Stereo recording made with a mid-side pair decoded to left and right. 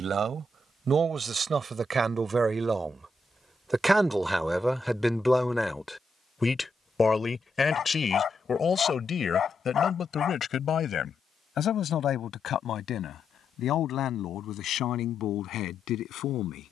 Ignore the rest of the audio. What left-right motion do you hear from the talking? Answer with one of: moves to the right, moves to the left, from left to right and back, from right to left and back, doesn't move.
moves to the left.